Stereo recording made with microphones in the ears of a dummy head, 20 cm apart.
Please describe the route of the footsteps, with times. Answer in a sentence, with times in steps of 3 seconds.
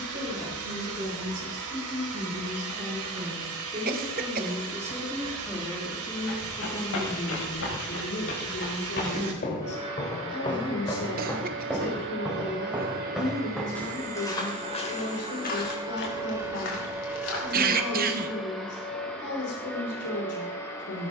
You can hear the footsteps not at all from 0 s, on the left from 6 s, in the centre from 12 s, on the left from 15 s and not at all from 18 s.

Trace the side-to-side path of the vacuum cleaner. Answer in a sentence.
In this clip you hear the vacuum cleaner move to the left.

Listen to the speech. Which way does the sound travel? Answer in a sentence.
In this clip you hear the speech move to the left.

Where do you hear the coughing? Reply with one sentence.
In this clip you hear the coughing on the right.